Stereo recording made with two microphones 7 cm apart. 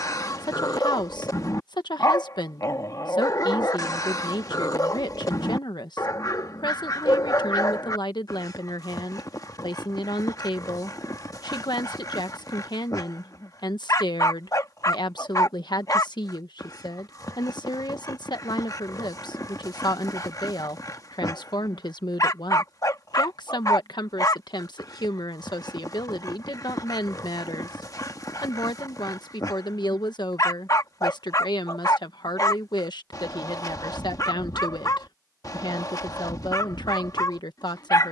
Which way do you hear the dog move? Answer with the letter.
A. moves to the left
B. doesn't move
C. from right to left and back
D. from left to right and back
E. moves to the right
B.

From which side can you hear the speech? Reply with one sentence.
In this clip you hear the speech on the left.